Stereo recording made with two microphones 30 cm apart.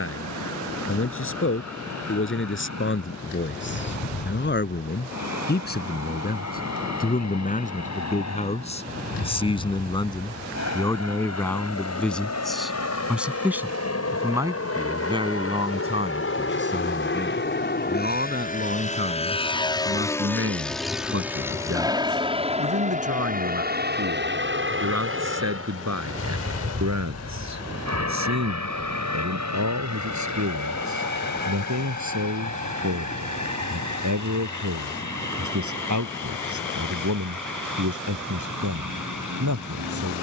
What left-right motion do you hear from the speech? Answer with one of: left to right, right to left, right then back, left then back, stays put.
left to right.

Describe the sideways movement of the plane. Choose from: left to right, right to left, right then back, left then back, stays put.
left to right.